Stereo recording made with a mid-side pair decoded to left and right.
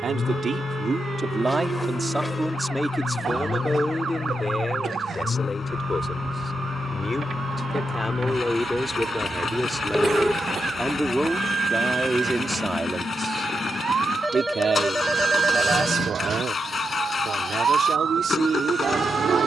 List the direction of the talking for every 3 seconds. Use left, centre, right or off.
right, left, left, centre, right, right, right.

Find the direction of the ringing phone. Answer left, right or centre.
centre.